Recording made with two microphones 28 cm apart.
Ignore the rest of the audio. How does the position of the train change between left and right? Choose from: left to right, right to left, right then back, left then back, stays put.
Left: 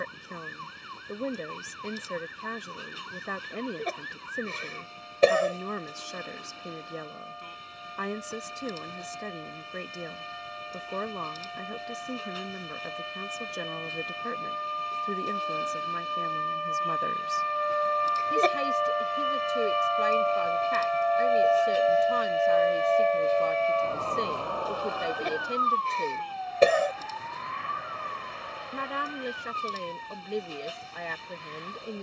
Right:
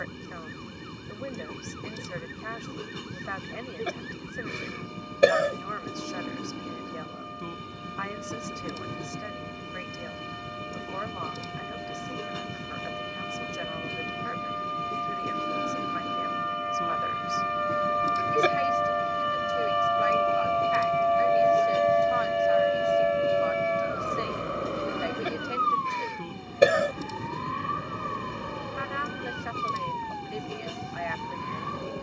stays put.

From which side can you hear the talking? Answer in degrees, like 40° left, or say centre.
40° left.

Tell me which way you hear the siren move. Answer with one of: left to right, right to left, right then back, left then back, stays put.
left to right.